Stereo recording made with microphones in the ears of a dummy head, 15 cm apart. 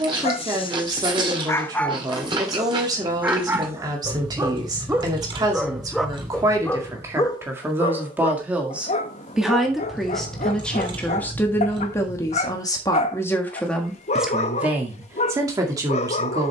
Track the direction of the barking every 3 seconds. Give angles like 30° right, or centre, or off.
20° left, 10° right, 20° left, 40° left, 40° left, 40° left.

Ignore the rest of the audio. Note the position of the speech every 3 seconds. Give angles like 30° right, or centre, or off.
20° right, 20° right, 10° right, 10° left, 10° left, 20° right.